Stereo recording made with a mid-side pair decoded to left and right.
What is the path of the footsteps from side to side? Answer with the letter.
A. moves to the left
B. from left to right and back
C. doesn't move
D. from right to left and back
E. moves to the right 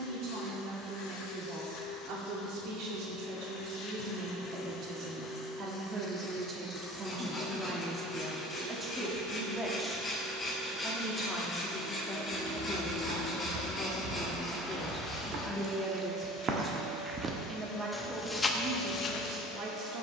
A.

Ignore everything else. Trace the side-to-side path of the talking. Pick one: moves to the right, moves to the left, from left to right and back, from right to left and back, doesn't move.
from right to left and back.